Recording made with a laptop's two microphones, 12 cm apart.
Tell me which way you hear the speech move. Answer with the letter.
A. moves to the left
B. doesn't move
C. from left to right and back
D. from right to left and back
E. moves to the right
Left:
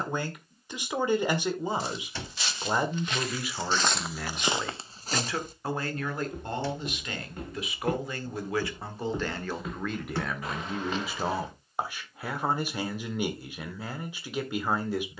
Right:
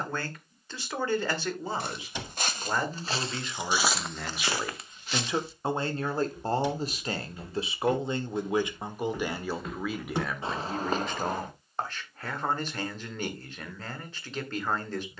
C.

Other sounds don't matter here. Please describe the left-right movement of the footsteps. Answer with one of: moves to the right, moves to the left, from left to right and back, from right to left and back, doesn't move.
from right to left and back.